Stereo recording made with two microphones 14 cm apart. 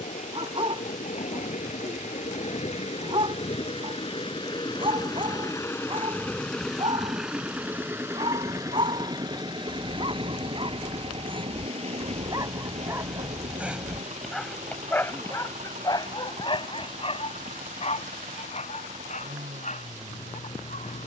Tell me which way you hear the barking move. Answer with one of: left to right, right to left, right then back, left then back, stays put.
right to left.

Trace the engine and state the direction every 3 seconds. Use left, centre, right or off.
left, left, centre, right, right, right, right.